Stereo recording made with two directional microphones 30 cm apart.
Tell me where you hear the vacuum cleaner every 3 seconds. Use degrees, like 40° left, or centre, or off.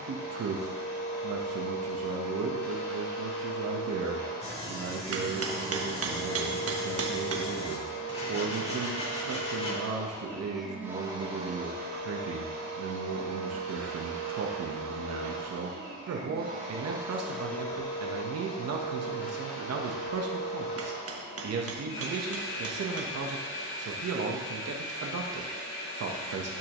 40° left, 40° left, 40° left, centre, 50° right, 20° right, 40° left, 40° left, 40° left.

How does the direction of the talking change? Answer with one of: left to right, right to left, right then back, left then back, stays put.
stays put.